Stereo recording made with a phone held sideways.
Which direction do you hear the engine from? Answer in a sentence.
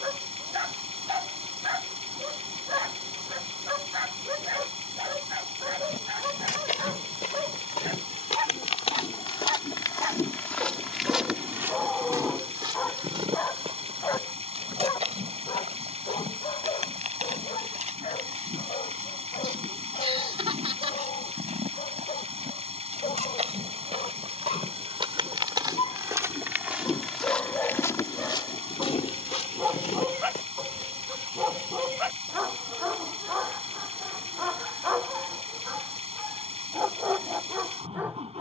In this clip you hear the engine on the right.